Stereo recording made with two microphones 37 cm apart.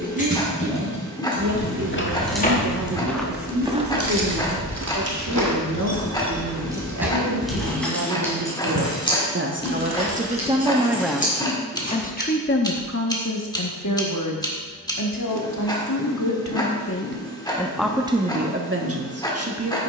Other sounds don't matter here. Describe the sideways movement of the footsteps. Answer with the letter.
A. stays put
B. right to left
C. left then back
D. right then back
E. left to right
E.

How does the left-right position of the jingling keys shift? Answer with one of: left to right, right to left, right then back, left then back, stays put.
right then back.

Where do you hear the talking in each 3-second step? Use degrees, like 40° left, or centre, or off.
50° right, 50° right, 50° right, 20° right, 40° left, 40° left, 30° right.